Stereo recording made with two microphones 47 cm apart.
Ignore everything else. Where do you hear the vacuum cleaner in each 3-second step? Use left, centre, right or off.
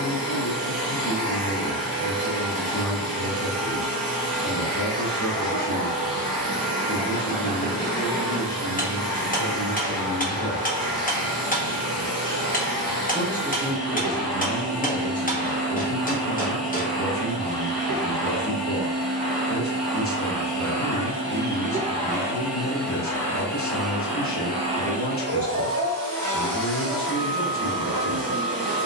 right, right, right, right, right, right, right, centre, right, right.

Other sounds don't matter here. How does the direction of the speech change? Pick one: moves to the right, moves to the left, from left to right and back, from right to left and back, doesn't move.
from left to right and back.